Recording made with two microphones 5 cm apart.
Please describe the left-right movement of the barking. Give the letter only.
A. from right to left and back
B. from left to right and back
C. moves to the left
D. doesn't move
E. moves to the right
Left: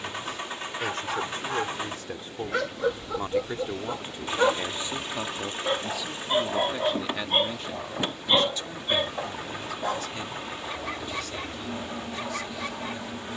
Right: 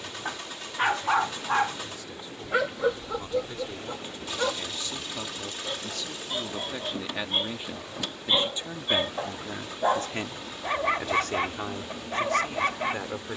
A.